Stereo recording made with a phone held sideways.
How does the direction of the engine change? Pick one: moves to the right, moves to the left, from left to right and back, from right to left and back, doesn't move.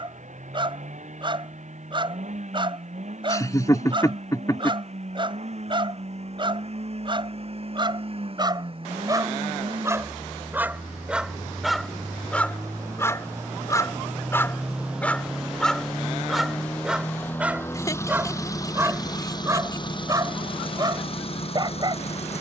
moves to the left.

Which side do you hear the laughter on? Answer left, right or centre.
left.